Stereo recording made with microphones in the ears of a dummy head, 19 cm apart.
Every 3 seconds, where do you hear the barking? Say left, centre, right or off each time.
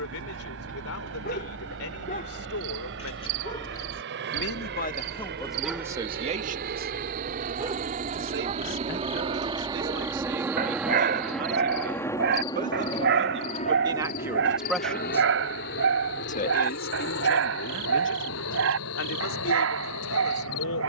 left, centre, right, right, right, right, right.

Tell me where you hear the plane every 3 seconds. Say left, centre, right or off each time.
right, right, right, centre, left, left, left.